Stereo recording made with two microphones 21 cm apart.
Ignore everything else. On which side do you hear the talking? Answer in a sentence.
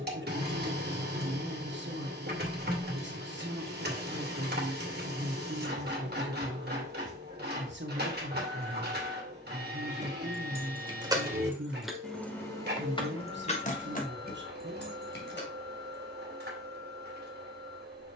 In this clip you hear the talking on the right.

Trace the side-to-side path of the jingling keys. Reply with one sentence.
In this clip you hear the jingling keys travel towards the left.